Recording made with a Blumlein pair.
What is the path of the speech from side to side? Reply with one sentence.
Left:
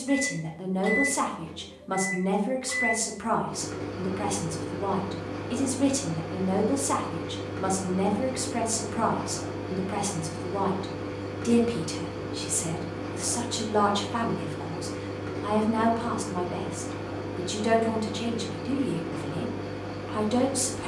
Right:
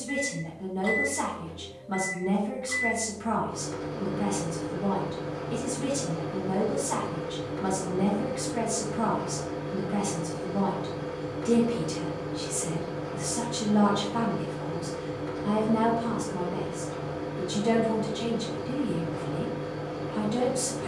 You can hear the speech stay in one place.